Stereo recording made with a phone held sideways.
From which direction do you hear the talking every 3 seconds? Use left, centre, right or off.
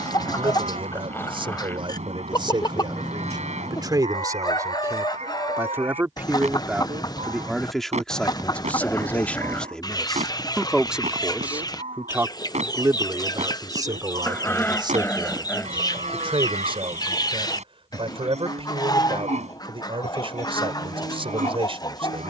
right, right, centre, centre, right, right, right, right.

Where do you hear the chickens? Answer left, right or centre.
left.